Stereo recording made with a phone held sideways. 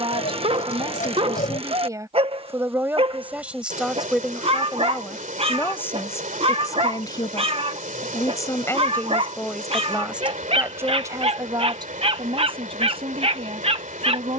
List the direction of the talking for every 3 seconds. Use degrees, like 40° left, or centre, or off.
30° right, centre, 20° left, 10° right, 40° right.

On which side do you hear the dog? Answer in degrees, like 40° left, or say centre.
40° right.